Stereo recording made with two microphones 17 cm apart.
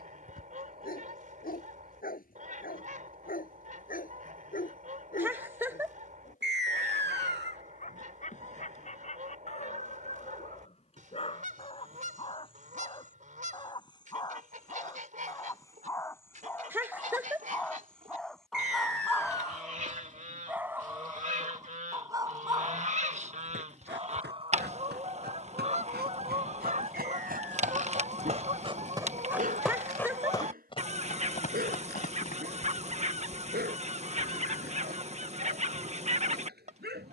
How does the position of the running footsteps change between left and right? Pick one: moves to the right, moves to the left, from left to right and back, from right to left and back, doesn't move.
moves to the left.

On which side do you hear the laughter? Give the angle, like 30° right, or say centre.
10° right.